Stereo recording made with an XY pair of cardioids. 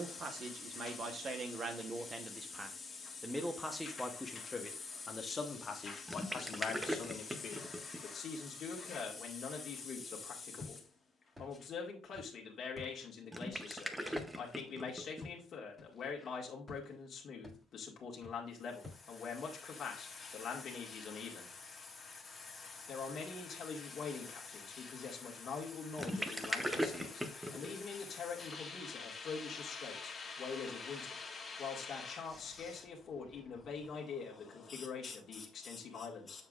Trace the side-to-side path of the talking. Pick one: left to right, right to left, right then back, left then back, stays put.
right to left.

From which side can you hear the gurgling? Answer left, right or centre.
centre.